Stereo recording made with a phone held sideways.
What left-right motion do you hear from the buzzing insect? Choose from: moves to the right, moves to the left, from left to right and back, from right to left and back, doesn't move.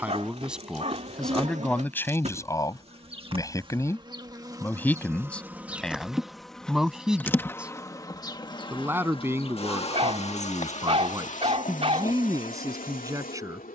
moves to the left.